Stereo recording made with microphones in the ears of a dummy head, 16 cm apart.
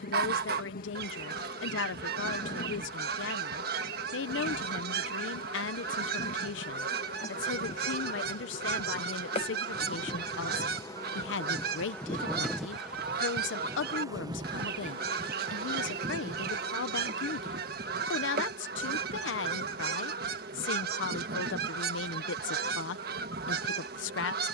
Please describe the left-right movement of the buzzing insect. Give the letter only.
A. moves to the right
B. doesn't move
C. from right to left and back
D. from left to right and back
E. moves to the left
A.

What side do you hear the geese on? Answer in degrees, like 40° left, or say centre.
60° right.